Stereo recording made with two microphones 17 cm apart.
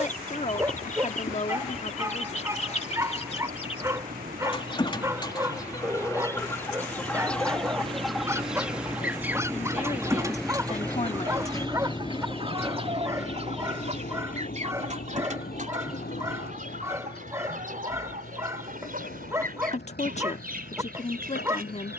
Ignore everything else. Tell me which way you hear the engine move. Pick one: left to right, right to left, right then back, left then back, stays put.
right to left.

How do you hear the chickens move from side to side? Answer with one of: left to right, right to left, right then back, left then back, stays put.
left to right.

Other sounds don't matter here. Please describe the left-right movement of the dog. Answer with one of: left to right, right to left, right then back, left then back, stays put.
stays put.